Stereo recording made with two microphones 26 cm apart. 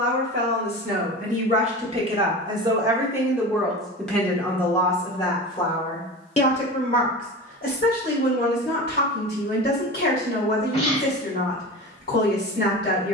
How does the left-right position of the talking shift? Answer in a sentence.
You can hear the talking travel towards the left.